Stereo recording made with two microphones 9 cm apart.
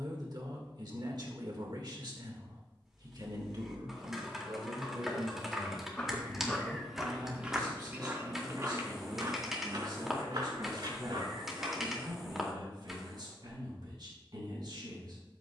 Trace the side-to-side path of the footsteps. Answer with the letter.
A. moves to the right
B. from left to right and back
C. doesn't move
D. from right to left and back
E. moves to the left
A.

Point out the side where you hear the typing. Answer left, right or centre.
centre.